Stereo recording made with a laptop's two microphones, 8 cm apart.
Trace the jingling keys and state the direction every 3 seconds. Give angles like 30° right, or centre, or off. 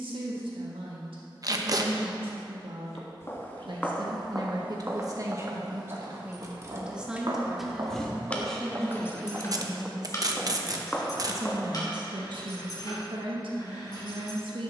off, off, 10° right, 40° left, 50° left.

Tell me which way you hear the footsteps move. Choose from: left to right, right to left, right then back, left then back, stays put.
right then back.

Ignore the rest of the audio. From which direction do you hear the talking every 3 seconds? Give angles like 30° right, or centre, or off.
80° right, 50° right, 10° right, 20° right, 70° right.